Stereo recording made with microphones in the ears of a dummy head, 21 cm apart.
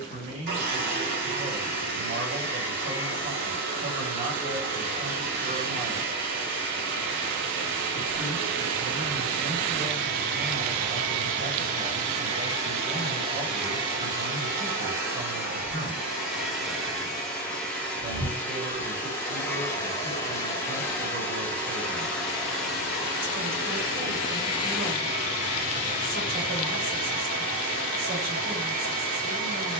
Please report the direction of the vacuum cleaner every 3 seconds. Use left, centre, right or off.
right, right, right, right, right, centre, centre, centre, right, right.